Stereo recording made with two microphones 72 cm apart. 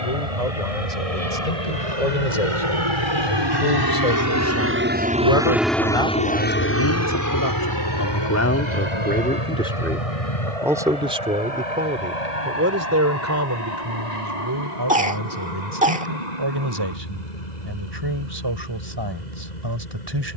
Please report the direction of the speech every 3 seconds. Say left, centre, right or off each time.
left, left, left, centre, right, right, right.